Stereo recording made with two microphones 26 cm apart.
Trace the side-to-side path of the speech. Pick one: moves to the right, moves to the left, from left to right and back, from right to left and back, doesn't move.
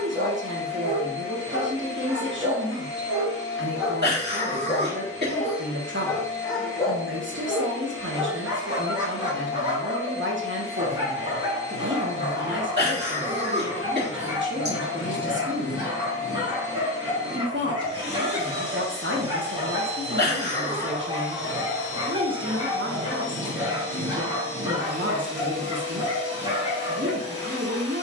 doesn't move.